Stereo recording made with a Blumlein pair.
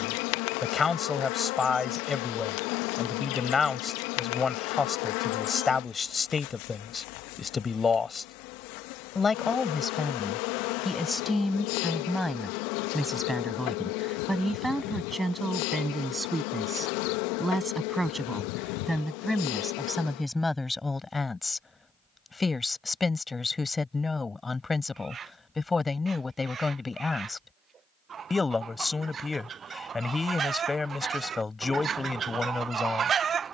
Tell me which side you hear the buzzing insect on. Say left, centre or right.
left.